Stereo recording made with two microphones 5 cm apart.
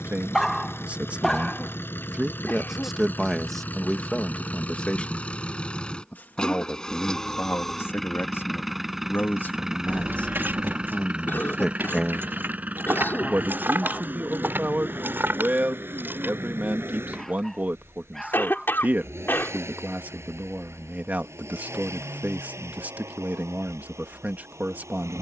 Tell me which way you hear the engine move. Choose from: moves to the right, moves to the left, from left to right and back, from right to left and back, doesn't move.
moves to the right.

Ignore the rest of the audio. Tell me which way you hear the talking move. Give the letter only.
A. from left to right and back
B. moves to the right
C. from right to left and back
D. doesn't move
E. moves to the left
C.